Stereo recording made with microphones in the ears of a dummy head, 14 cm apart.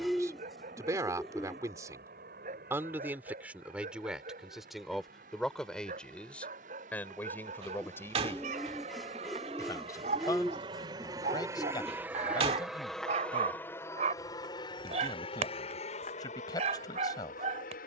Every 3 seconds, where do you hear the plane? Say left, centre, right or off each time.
right, right, right, right, centre, left.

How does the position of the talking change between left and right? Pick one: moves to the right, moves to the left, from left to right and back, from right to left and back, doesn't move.
moves to the left.